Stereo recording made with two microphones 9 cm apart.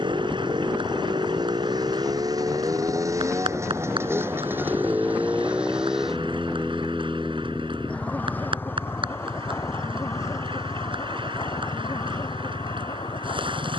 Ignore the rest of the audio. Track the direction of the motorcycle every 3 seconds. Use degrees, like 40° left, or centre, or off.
50° right, 20° right, 10° left, 30° left, 50° left.